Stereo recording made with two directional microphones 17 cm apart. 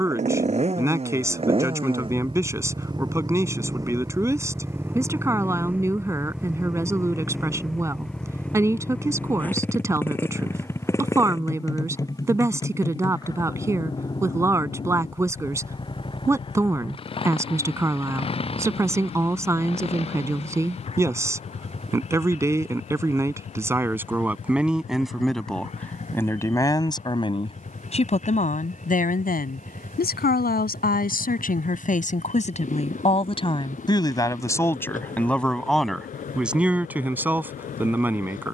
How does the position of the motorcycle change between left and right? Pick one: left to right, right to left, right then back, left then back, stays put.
right to left.